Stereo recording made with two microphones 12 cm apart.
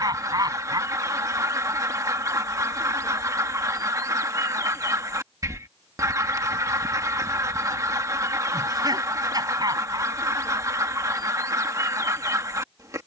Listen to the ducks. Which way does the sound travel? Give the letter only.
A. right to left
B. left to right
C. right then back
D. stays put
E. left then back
D.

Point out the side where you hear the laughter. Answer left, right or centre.
right.